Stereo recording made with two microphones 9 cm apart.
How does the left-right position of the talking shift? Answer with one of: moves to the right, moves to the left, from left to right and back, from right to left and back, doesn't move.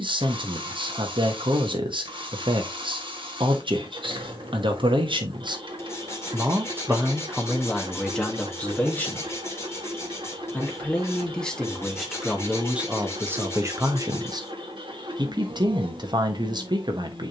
from right to left and back.